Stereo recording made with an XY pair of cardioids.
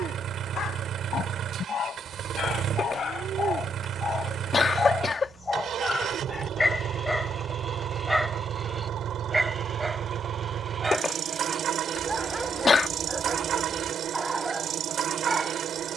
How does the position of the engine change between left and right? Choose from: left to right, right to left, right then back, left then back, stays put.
stays put.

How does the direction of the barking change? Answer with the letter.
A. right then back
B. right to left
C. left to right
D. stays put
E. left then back
C.